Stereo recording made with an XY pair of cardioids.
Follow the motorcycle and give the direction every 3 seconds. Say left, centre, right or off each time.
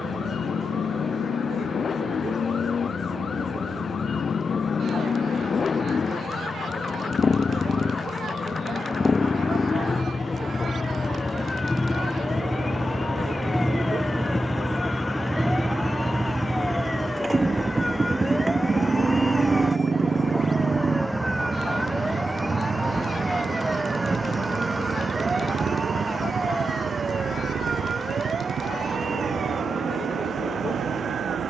left, left, left, left, centre, centre, right, right, right, right, right.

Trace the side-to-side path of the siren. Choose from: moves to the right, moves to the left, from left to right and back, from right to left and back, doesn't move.
moves to the right.